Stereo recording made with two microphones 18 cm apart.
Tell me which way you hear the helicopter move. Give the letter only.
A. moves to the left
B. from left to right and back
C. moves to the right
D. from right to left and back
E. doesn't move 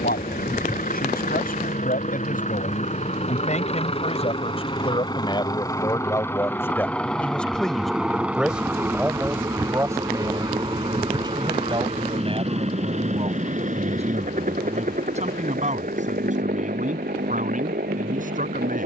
C.